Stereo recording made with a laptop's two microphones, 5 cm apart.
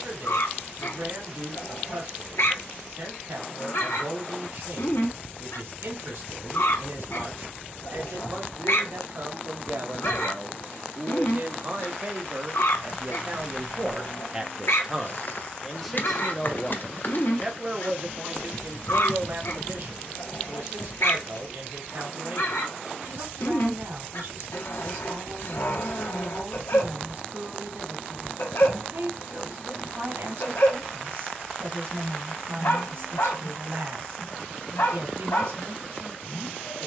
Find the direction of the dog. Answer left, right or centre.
left.